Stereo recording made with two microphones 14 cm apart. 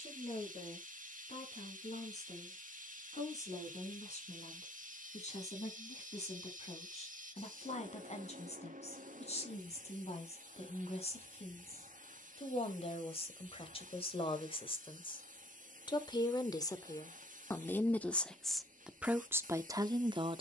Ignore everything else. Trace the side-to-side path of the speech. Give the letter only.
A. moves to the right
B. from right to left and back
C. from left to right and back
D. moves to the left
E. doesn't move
A.